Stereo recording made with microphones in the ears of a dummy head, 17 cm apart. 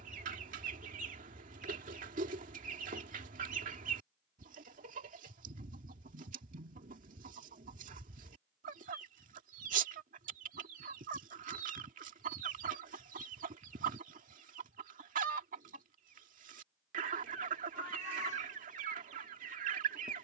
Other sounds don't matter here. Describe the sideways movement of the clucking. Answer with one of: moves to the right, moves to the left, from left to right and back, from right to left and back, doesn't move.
doesn't move.